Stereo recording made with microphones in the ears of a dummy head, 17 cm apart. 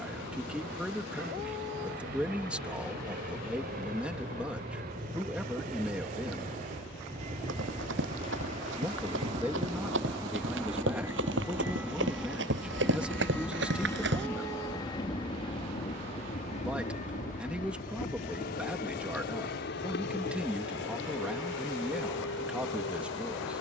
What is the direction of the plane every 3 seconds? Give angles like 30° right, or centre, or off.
60° right, 50° right, 40° right, 20° right, 10° left, 40° left, 50° left, 60° left.